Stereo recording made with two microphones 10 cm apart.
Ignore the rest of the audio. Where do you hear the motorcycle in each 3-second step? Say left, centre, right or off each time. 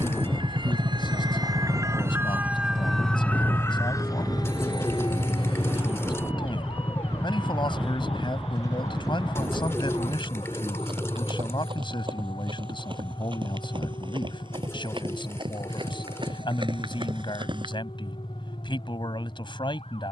right, centre, left, left, left, left, left.